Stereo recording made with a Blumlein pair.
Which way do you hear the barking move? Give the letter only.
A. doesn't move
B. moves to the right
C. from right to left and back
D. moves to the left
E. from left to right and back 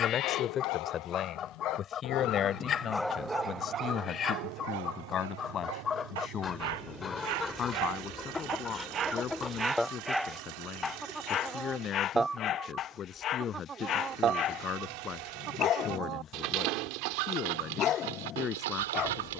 E.